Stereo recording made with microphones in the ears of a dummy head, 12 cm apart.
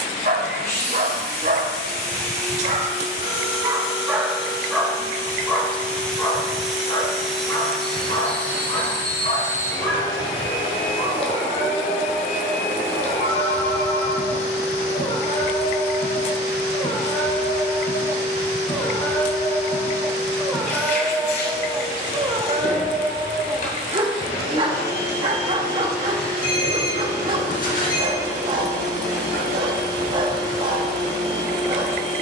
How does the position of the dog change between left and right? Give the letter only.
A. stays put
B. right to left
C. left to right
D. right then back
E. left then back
E.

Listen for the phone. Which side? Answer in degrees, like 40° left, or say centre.
70° left.